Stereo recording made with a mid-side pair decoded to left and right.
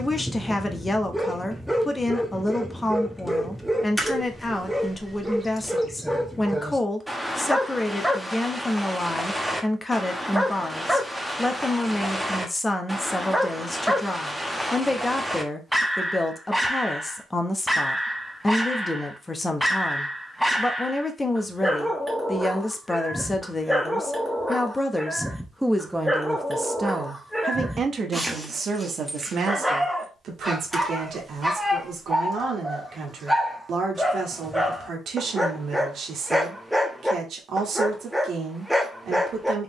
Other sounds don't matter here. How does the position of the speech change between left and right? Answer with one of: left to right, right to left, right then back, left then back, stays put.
left to right.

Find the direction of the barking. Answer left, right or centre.
centre.